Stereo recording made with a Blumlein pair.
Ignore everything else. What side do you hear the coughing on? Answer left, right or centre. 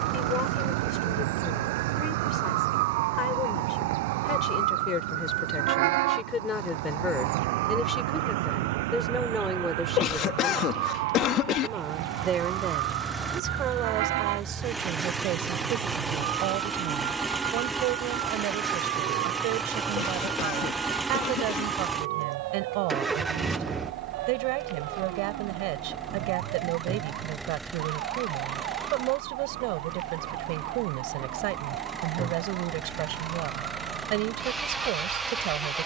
left.